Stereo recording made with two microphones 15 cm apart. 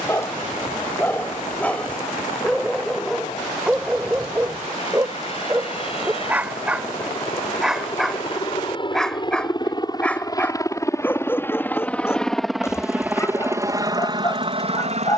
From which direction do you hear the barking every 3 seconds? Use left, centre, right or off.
centre, centre, centre, centre, left.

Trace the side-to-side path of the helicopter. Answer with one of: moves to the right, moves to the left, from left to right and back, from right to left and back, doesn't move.
moves to the right.